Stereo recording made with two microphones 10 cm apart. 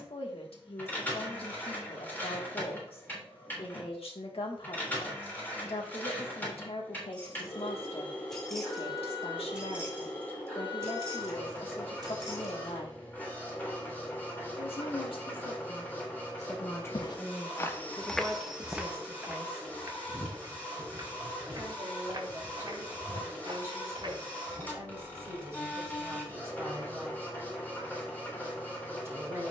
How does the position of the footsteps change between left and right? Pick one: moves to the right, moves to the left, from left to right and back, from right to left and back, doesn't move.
moves to the right.